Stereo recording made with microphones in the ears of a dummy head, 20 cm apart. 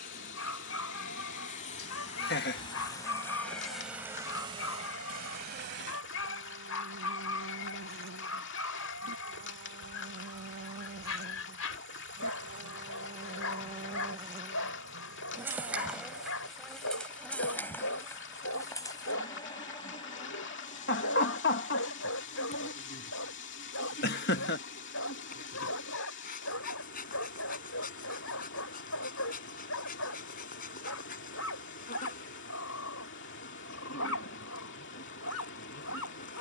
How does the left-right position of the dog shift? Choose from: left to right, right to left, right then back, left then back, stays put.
stays put.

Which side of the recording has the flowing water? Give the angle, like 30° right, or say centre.
60° left.